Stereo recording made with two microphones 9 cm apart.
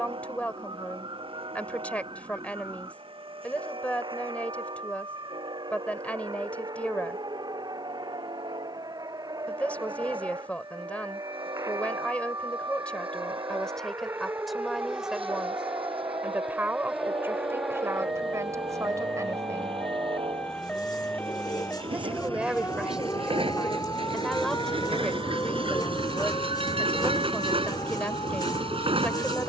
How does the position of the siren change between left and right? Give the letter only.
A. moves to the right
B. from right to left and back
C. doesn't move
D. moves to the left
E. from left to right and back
D.